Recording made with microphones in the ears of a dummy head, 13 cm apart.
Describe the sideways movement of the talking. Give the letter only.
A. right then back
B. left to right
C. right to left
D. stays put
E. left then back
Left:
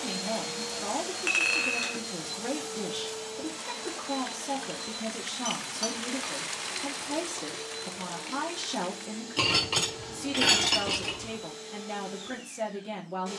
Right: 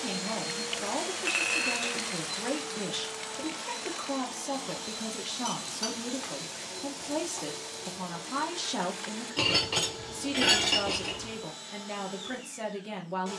D.